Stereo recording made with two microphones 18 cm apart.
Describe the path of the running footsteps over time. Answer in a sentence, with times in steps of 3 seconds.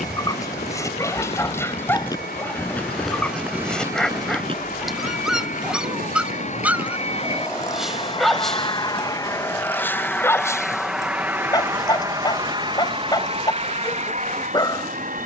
In this clip you hear the running footsteps on the left from 0 s, on the right from 3 s and not at all from 9 s.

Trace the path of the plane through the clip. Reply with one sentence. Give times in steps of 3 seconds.
In this clip you hear the plane on the left from 0 s, in the centre from 9 s and on the right from 12 s.